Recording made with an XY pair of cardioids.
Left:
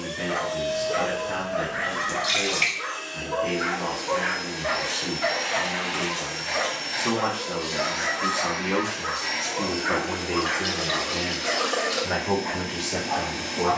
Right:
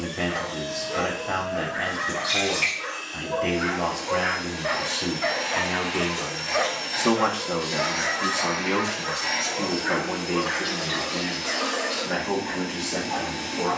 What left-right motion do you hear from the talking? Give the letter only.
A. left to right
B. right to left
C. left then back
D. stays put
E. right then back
B.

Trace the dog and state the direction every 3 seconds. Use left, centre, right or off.
left, centre, centre, left, left.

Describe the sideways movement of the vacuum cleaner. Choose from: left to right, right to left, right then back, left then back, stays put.
right then back.